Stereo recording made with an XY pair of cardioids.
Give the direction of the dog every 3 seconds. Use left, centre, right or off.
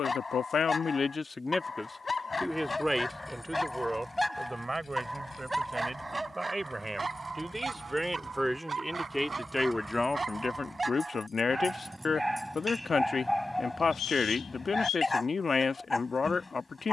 left, centre, right, right, centre, left.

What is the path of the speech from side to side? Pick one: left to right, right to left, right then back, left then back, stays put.
right then back.